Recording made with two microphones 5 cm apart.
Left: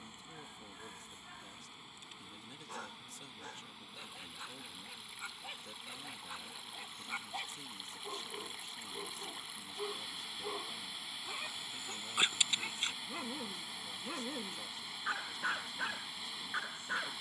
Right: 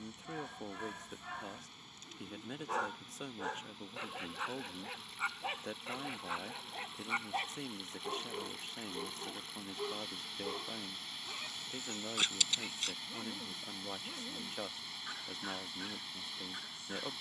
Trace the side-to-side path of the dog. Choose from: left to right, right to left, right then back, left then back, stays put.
right to left.